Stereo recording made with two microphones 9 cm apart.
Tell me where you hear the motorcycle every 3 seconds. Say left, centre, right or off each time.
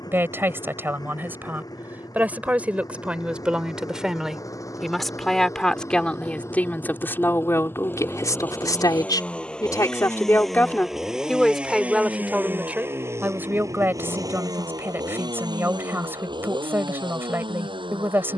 left, left, left, centre, right, right.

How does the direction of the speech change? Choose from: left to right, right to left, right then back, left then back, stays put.
left then back.